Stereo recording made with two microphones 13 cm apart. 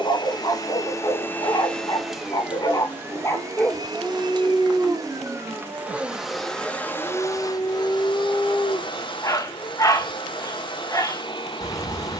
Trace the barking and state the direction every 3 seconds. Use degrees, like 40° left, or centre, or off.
40° left, centre, 10° left, 30° left.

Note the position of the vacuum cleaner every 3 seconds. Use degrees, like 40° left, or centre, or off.
10° left, 30° right, 30° left, 40° left.